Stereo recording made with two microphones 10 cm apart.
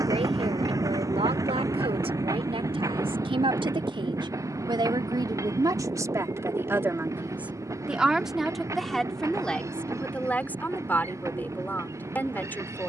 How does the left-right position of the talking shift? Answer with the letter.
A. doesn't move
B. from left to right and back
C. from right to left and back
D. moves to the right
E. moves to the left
E.